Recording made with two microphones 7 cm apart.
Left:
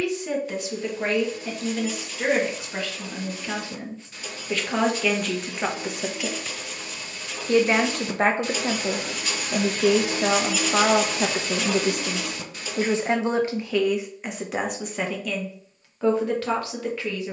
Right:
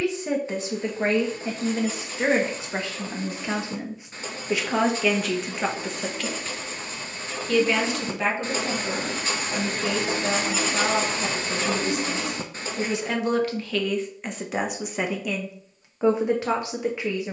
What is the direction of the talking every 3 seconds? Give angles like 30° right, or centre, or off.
30° right, 10° right, 40° left, 70° left, 20° left, 20° right.